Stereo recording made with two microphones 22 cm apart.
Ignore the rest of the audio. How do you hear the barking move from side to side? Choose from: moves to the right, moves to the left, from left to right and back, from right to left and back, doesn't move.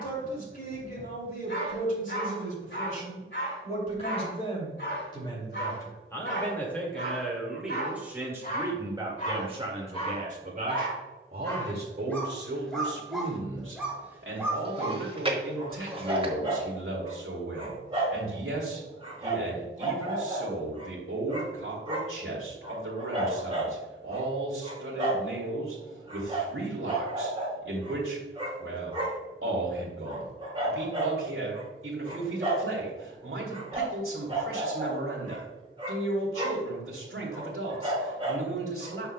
moves to the right.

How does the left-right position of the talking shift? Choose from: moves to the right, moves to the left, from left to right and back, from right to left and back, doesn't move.
moves to the right.